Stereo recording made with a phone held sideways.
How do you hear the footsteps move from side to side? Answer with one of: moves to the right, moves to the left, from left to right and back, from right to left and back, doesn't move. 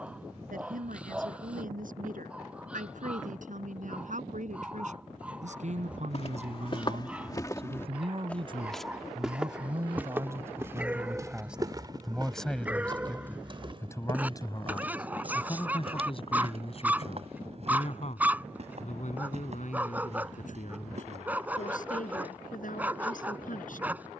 moves to the right.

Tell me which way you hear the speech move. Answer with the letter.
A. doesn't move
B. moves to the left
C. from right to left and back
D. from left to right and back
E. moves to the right
B.